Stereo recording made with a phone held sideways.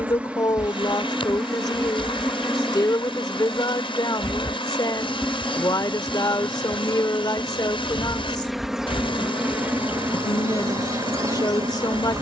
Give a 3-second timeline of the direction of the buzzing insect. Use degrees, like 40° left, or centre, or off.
centre, 10° left, centre, 20° right.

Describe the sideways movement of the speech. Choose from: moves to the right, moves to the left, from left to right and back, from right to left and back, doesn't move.
doesn't move.